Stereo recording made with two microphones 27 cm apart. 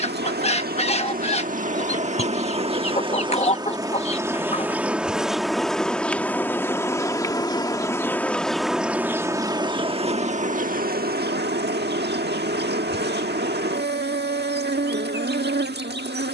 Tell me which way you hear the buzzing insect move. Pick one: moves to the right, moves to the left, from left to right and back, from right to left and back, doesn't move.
from right to left and back.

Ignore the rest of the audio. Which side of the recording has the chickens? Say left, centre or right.
left.